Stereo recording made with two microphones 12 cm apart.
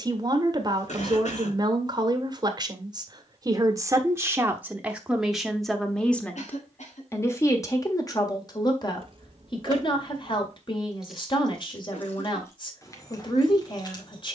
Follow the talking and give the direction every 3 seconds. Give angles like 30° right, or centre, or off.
30° right, 10° right, 20° left, 40° left, 40° left.